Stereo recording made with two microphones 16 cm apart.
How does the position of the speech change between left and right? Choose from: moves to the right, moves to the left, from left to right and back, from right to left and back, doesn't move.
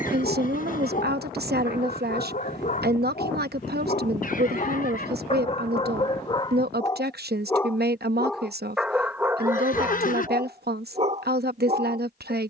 doesn't move.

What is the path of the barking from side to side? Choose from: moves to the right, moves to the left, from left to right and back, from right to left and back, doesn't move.
moves to the right.